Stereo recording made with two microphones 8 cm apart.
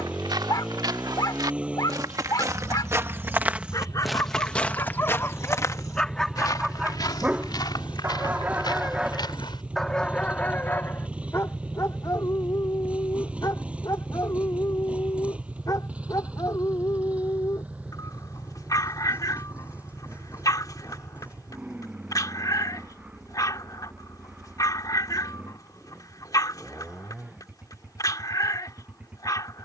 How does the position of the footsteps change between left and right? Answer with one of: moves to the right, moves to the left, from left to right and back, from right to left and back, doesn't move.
moves to the left.